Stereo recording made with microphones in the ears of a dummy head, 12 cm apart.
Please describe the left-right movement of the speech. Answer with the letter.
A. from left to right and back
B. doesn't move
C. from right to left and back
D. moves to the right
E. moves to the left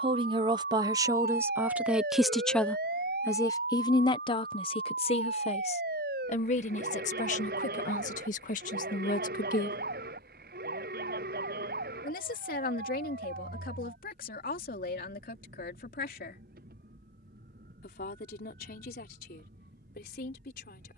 E.